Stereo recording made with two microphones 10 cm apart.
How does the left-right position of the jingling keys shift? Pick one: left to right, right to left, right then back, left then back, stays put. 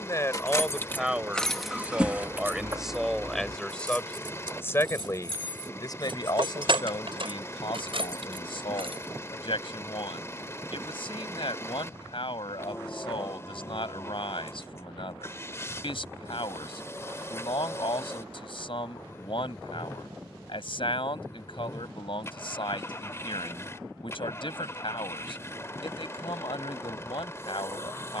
left to right.